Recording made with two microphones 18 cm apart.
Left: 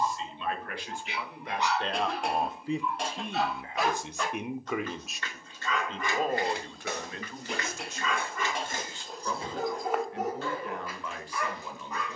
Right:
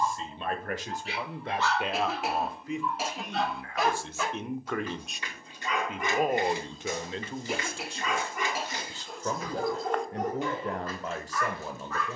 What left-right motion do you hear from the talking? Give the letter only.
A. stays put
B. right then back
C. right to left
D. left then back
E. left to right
D.